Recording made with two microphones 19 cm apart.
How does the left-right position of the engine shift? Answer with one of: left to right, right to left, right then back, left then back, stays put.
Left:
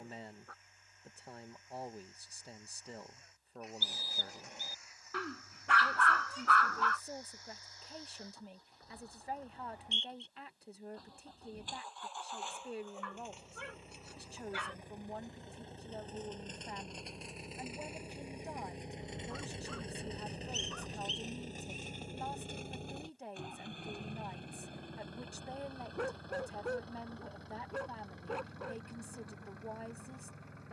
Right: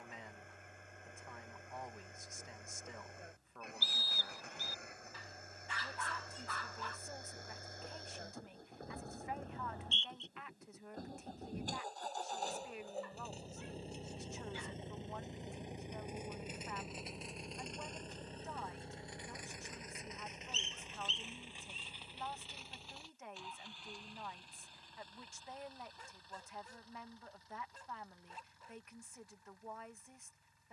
right to left.